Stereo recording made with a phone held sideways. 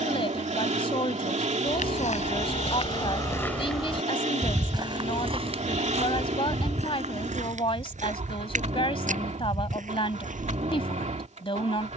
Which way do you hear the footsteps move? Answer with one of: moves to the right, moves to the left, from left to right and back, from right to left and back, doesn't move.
moves to the right.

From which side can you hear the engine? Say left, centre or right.
right.